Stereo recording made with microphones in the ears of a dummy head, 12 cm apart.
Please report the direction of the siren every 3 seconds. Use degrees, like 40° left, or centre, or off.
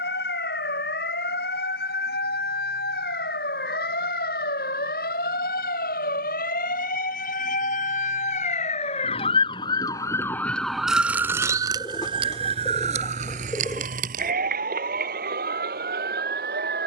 80° left, 70° left, 60° left, 10° left, 50° right, 70° right.